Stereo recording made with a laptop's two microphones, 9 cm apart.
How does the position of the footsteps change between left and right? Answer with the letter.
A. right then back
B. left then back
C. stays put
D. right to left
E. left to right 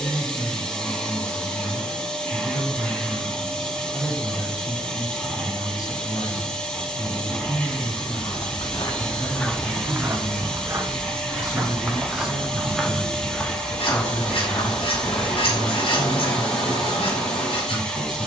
A.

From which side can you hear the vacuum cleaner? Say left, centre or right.
centre.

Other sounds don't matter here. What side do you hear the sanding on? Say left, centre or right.
left.